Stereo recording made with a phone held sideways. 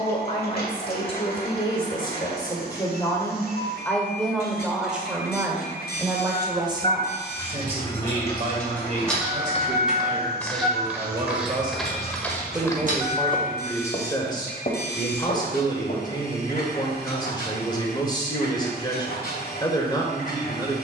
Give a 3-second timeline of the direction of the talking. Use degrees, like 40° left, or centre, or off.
30° left, centre, 30° right, 40° right, 10° left, 30° left, 30° left.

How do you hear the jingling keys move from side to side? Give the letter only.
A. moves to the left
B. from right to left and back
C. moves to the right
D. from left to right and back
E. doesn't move
C.